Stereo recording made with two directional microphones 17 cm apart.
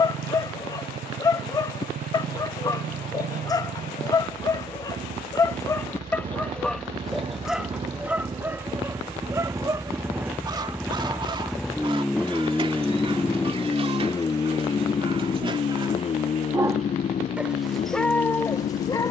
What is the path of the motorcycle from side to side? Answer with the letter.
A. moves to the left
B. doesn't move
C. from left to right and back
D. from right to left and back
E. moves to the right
A.